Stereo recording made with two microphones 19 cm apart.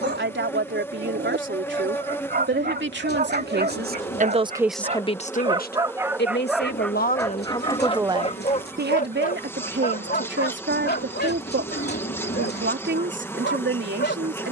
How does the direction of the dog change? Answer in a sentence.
In this clip you hear the dog move from right to left.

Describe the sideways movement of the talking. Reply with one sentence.
You can hear the talking move from right to left and back again.